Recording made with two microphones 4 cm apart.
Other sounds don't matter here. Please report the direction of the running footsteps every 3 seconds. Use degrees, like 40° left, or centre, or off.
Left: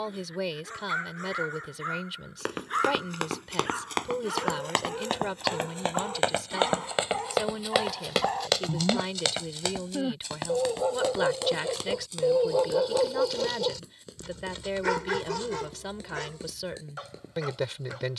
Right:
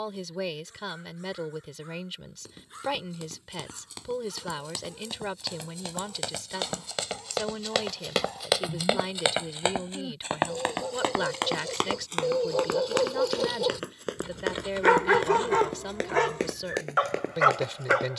70° left, 50° left, 10° left, 40° right, 60° right, 70° right.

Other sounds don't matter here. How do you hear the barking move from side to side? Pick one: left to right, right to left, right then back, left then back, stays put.
left to right.